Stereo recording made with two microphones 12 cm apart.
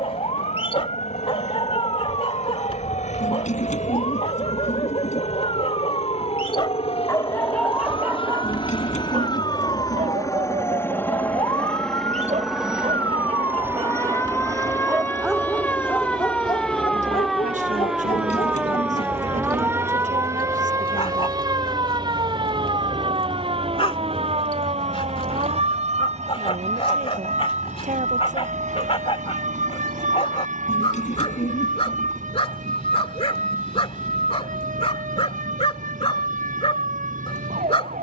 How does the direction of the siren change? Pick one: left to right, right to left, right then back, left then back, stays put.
left to right.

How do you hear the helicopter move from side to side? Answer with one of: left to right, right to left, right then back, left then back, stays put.
left to right.